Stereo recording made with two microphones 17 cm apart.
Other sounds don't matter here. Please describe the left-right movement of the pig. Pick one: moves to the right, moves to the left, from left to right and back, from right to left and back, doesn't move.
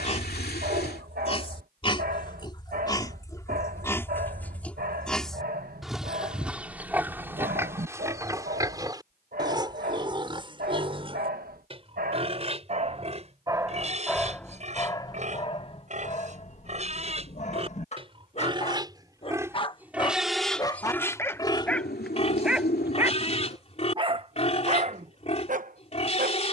from left to right and back.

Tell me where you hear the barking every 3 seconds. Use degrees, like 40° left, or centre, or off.
60° right, 60° right, 60° right, 60° right, 20° right, 40° left, 30° left, centre, 50° right.